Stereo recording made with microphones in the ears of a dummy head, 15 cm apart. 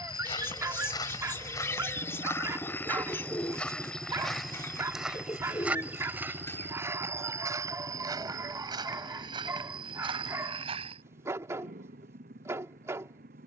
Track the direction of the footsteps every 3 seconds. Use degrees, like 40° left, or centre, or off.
20° left, centre, 20° right, 30° right, off.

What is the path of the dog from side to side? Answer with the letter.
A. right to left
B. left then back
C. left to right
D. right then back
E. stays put
E.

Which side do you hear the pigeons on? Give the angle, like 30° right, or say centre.
20° left.